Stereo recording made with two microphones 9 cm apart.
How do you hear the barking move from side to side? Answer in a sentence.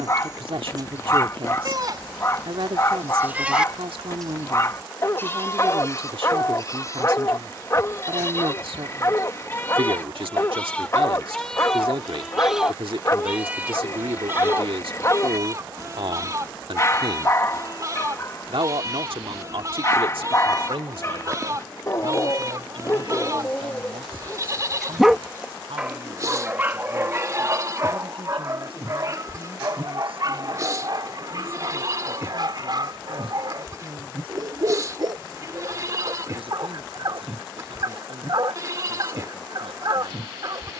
You can hear the barking move to the right.